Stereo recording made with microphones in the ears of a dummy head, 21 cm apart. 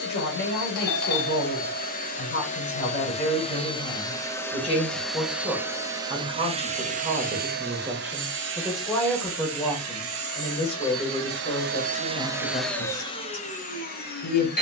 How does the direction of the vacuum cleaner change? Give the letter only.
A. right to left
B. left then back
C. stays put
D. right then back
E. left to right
D.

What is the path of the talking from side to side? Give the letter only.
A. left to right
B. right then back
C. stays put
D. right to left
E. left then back
B.